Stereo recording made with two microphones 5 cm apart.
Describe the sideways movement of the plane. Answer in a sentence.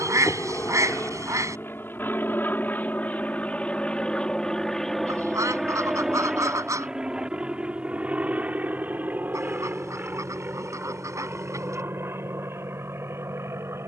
In this clip you hear the plane travel towards the right.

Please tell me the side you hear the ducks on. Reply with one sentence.
In this clip you hear the ducks on the right.